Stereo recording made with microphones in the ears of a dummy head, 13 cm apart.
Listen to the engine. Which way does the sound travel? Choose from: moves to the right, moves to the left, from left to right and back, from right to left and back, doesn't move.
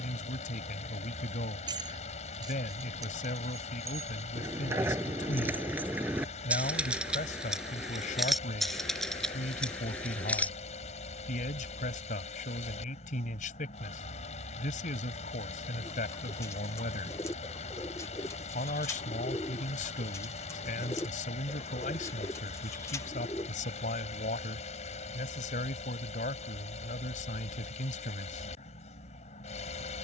doesn't move.